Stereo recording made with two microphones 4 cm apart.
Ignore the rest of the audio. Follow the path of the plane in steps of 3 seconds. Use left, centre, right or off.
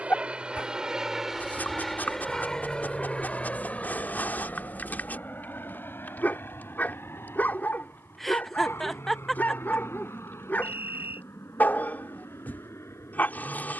centre, left, left, left, left.